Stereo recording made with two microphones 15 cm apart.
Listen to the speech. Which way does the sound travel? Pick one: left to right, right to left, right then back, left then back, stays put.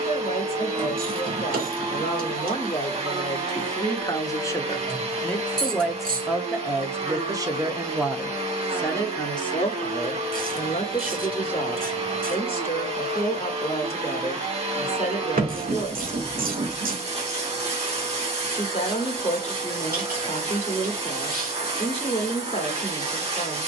right then back.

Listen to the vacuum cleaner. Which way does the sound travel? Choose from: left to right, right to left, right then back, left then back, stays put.
stays put.